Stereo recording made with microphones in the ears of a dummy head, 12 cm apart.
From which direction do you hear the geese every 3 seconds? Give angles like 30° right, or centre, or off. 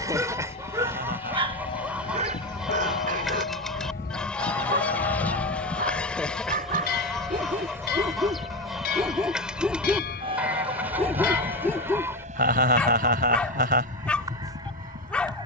10° right, 10° left, centre, 10° right, 30° right.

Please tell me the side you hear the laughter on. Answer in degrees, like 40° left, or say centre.
70° right.